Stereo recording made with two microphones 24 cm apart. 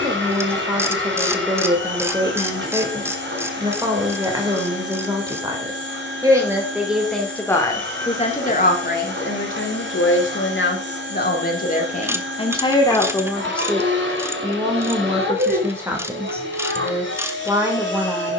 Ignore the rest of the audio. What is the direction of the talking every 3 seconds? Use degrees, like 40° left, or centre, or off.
20° right, 20° right, 10° left, 50° left, 10° left, 10° right.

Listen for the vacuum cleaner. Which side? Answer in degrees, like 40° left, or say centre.
50° right.